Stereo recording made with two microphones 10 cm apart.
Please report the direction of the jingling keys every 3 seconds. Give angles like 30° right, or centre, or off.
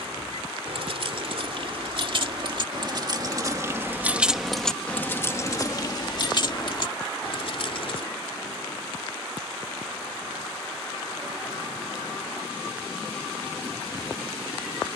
60° right, centre, 60° left, off, off.